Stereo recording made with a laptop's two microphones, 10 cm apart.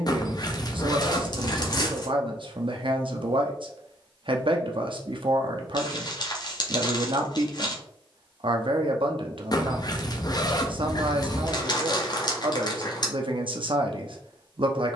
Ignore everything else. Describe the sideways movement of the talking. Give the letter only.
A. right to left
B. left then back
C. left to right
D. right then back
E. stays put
E.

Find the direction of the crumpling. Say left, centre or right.
left.